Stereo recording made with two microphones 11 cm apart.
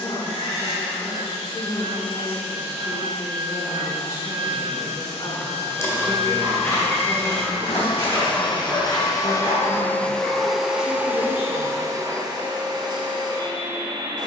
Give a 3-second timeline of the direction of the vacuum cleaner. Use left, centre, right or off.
left, left, left, centre, right.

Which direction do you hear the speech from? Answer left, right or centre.
left.